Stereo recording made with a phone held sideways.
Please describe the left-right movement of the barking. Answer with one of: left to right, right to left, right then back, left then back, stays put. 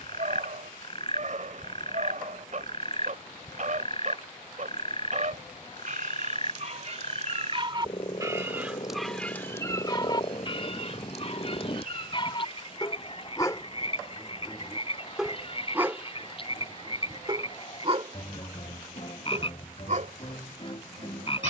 left then back.